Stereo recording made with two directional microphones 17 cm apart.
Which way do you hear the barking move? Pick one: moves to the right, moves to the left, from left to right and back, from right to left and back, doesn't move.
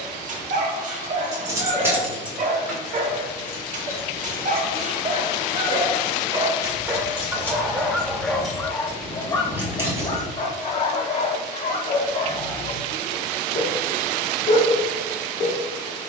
moves to the left.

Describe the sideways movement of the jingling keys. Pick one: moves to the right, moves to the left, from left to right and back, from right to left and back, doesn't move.
from right to left and back.